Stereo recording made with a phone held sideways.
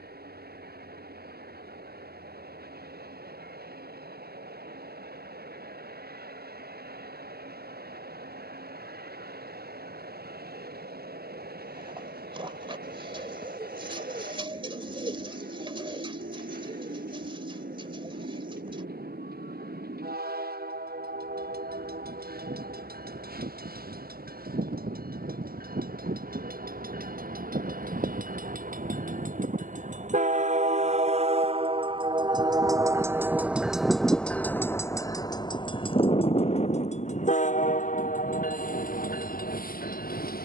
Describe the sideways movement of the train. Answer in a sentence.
You can hear the train travel towards the left.